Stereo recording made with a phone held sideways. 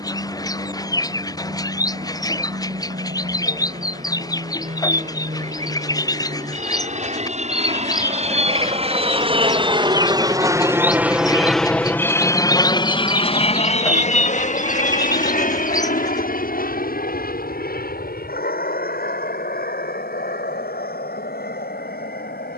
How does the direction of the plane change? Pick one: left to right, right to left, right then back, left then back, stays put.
right to left.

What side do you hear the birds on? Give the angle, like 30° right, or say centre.
30° left.